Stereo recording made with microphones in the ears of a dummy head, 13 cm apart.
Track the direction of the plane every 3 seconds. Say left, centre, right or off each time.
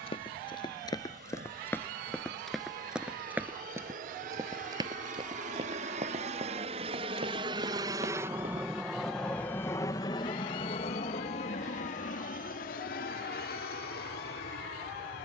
right, right, right, left, left.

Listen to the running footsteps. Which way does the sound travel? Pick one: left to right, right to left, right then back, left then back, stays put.
left to right.